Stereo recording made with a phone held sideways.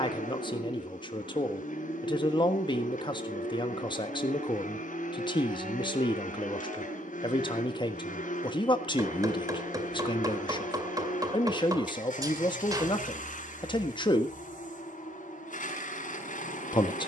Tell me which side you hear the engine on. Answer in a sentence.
In this clip you hear the engine on the left.